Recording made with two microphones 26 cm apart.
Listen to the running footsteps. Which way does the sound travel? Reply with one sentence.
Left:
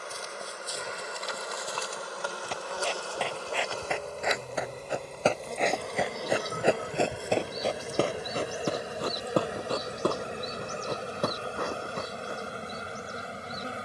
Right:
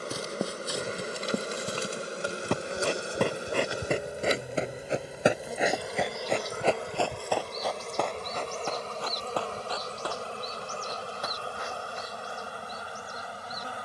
You can hear the running footsteps go from the right side to the left.